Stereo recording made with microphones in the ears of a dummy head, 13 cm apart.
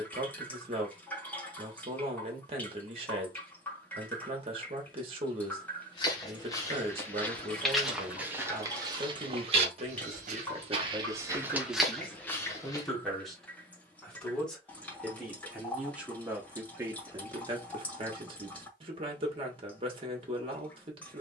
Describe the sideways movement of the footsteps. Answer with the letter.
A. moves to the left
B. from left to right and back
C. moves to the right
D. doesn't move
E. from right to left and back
B.